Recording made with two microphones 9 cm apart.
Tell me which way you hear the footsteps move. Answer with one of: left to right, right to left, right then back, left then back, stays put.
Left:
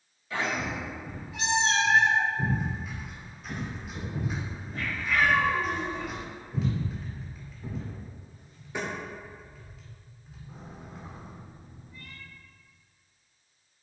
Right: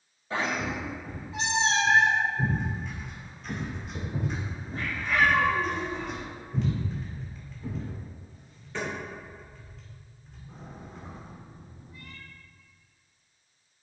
right then back.